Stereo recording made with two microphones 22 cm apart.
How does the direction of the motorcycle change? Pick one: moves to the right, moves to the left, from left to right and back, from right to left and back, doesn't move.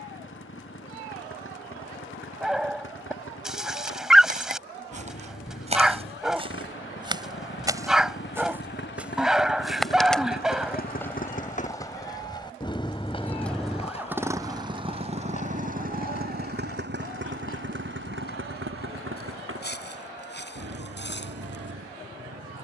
moves to the right.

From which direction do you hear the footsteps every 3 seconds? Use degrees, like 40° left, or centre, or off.
off, 30° right, 20° right, 10° left, 30° left, 40° left, 50° left, 60° left.